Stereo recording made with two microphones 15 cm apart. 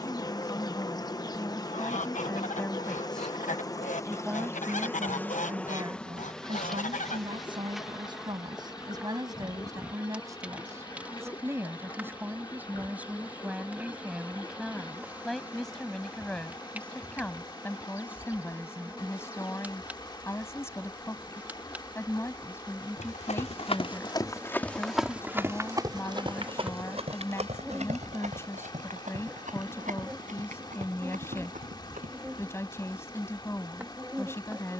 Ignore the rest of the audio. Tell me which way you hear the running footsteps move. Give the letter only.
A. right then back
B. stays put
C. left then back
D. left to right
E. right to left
D.